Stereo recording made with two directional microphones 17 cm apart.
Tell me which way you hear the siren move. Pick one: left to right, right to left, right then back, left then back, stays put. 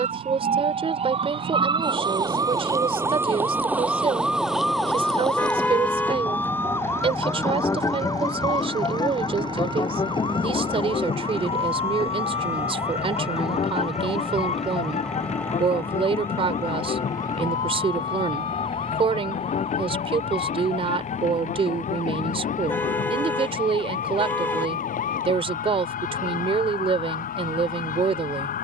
right to left.